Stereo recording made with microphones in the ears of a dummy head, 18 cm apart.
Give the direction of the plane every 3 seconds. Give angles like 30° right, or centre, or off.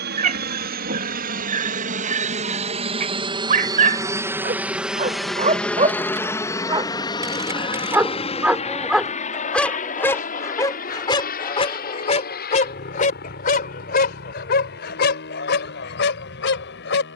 50° right, 10° right, 20° left, 40° left, 50° left, 50° left.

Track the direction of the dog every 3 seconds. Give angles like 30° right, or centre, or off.
40° right, 40° right, 20° right, 20° left, 40° left, 60° left.